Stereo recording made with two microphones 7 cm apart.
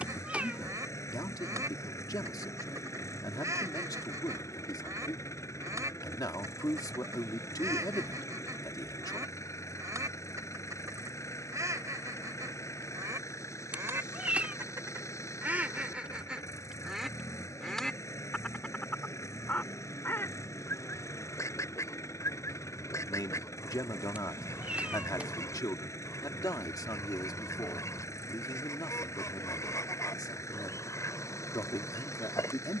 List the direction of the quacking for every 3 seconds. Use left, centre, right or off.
right, right, right, right, right, centre, left, left, left, left, left.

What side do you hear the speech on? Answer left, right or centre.
left.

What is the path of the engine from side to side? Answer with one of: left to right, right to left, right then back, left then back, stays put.
stays put.